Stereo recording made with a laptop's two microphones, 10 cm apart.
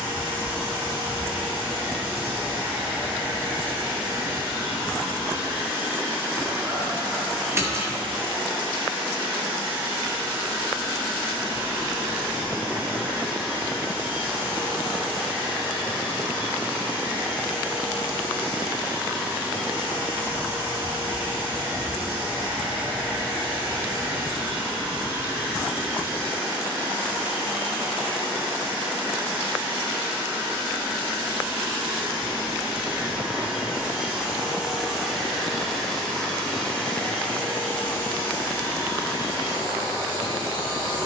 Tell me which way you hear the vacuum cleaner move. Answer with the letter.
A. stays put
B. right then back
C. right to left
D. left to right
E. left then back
C.